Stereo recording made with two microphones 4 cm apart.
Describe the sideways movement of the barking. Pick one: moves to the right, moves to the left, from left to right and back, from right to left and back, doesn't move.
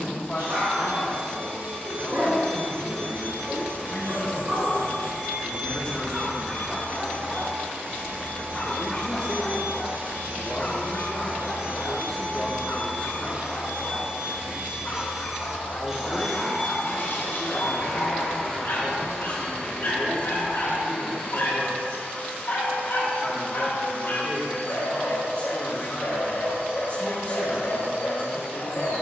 moves to the left.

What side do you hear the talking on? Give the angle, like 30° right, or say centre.
30° left.